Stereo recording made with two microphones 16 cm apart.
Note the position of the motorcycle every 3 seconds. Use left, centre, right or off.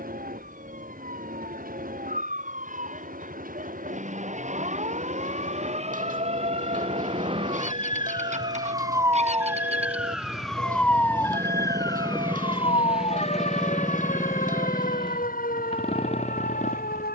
right, right, right, right, centre, left.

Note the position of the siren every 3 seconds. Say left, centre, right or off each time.
right, right, right, centre, left, left.